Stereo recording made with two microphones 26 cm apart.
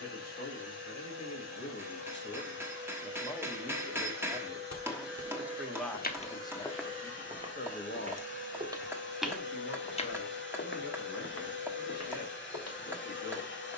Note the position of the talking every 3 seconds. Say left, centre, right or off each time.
left, centre, left, left, left.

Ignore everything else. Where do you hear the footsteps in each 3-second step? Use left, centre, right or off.
off, left, centre, left, left.